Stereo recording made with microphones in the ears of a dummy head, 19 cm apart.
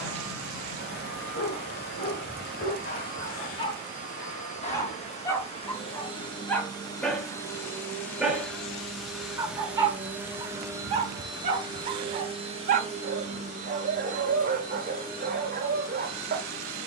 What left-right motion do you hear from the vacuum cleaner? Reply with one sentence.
You can hear the vacuum cleaner go from the left side to the right.